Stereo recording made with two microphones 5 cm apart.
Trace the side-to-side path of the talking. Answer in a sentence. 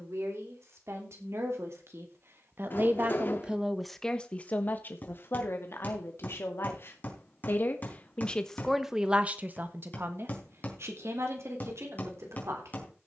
You can hear the talking move from right to left and back again.